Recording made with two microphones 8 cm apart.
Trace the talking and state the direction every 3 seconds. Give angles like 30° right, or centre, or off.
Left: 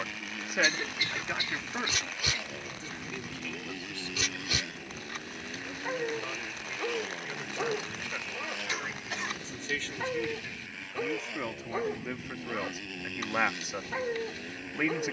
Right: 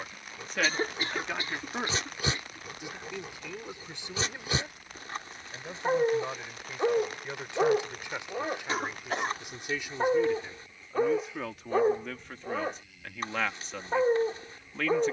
centre, 20° right, 20° right, 10° right, 10° left.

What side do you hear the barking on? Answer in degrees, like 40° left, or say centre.
30° right.